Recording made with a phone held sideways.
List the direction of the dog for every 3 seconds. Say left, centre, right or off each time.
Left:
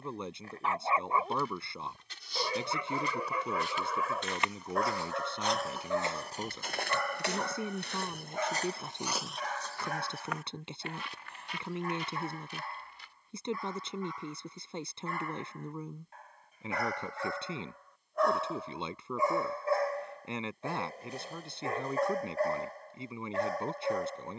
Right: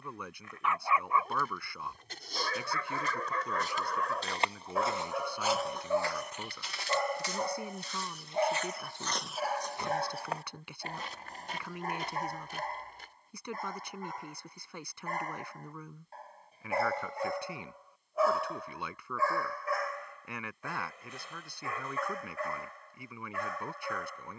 left, centre, right, right, right, right, left, left.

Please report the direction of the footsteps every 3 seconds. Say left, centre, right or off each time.
right, right, left, right, right, off, off, off.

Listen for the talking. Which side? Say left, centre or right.
left.